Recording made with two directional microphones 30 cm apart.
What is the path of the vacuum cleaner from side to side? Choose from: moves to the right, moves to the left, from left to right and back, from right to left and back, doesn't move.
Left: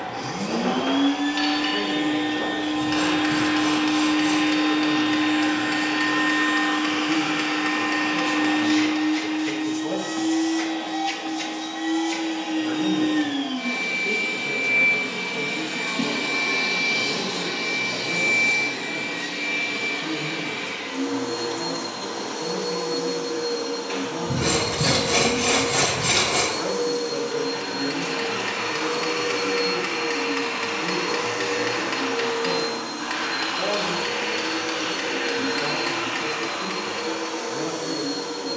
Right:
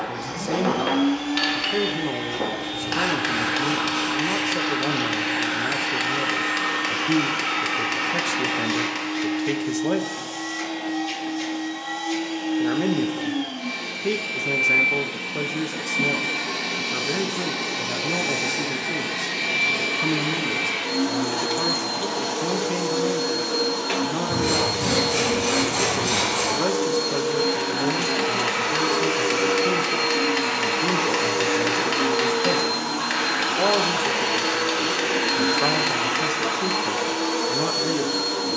moves to the right.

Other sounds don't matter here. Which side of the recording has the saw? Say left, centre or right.
left.